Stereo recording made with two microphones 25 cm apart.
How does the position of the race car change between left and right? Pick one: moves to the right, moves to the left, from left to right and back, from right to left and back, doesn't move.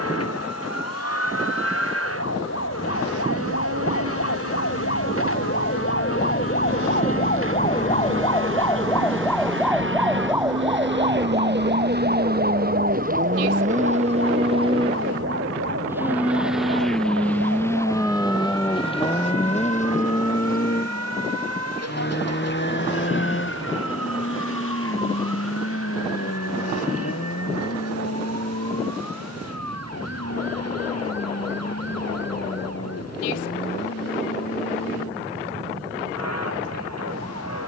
moves to the left.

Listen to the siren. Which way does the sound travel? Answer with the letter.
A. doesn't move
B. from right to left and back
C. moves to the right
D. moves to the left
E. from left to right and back
C.